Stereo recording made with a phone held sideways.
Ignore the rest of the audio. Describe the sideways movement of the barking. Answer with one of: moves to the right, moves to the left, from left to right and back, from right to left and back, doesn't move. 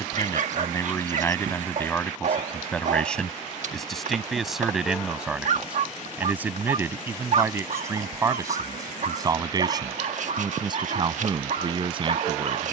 doesn't move.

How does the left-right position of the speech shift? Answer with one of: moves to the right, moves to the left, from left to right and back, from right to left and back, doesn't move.
moves to the right.